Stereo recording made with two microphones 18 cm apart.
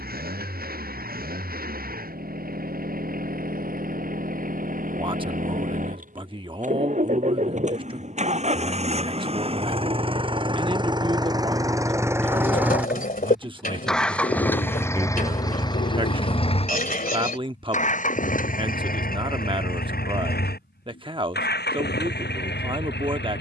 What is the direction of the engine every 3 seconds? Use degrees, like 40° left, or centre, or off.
60° right, 50° right, 40° right, 30° right, centre, 30° left, 50° left, 70° left.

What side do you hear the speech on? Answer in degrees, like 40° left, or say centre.
30° right.